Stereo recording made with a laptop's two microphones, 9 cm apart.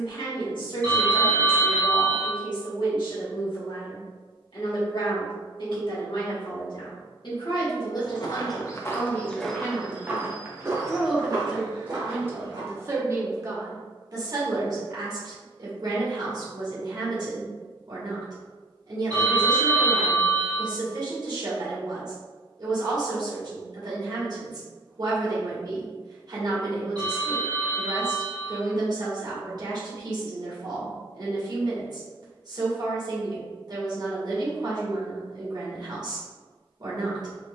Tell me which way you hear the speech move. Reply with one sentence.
In this clip you hear the speech travel towards the right.